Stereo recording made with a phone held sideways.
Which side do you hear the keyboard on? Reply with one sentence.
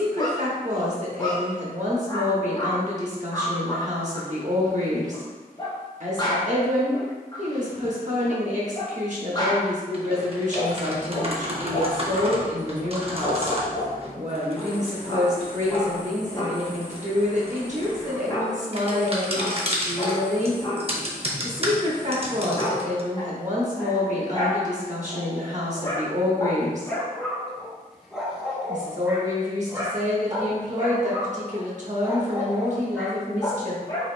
You can hear the keyboard on the right.